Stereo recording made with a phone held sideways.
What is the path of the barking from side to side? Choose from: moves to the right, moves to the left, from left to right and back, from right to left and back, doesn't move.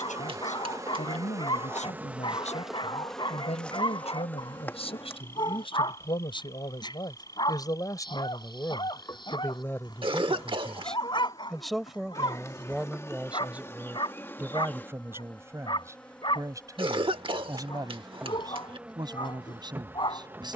doesn't move.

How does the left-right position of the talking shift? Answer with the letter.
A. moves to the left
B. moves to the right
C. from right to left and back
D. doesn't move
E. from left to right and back
B.